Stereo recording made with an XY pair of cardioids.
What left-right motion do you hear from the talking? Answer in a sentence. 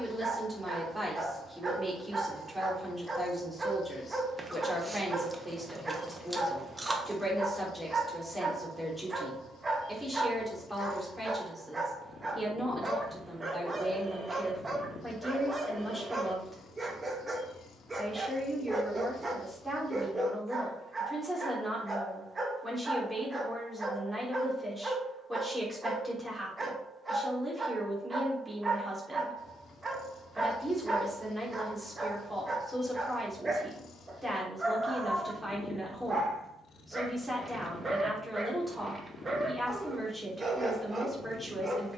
In this clip you hear the talking stay put.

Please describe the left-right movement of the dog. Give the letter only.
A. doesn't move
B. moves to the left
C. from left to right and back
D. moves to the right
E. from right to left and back
A.